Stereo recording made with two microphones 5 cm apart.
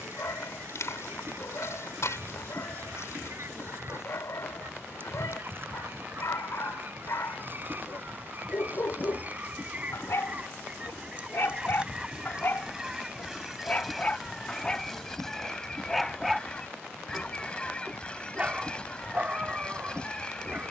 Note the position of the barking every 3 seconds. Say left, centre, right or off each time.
left, left, left, left, left, centre, right.